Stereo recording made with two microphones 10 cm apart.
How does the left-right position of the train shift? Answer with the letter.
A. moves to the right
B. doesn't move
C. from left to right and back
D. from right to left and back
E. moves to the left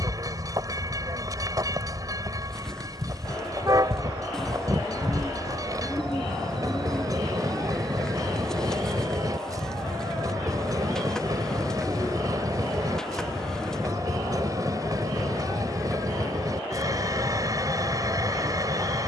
B.